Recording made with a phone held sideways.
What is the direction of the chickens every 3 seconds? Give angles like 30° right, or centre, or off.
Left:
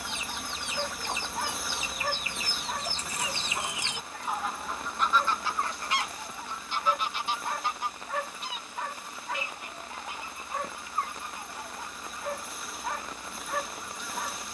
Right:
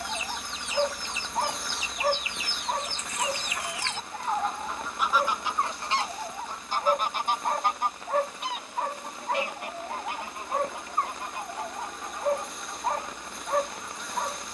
50° left, centre, 50° right, 70° right, 80° right.